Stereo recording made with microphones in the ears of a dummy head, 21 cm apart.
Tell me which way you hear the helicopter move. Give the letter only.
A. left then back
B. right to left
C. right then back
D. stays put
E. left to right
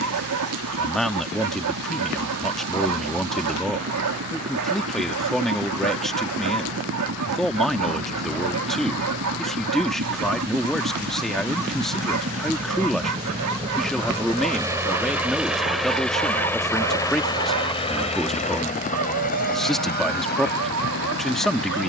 B.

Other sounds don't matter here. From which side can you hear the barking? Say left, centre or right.
right.